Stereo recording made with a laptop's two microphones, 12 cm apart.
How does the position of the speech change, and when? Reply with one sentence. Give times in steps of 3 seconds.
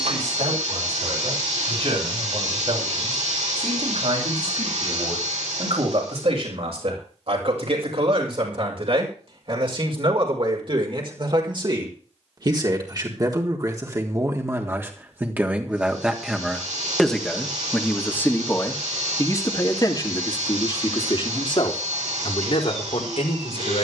In this clip you hear the speech on the right from 0 s, in the centre from 15 s and on the left from 18 s.